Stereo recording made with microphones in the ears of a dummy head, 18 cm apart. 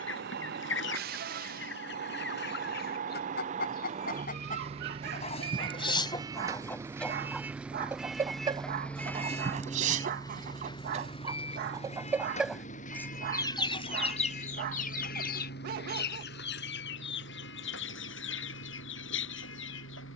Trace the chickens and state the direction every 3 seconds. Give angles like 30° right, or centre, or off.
60° left, 40° left, centre, 30° right, 20° left, 60° left, 70° left.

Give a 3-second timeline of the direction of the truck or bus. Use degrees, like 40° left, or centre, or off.
50° right, 30° right, 10° right, 20° left, 40° left, 50° left, 60° left.